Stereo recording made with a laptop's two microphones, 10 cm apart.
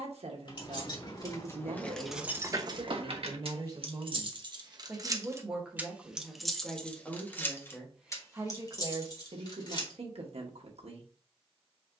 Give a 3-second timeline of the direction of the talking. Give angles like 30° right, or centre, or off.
70° right, 20° right, centre, 70° right.